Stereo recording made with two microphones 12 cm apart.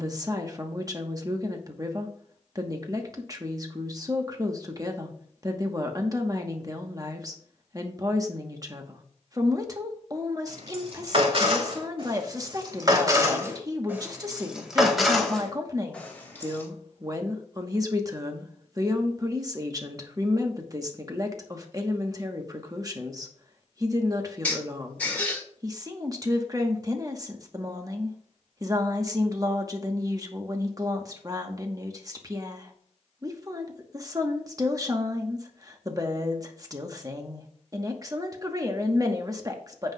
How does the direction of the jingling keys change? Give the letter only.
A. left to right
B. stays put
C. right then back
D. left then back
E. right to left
E.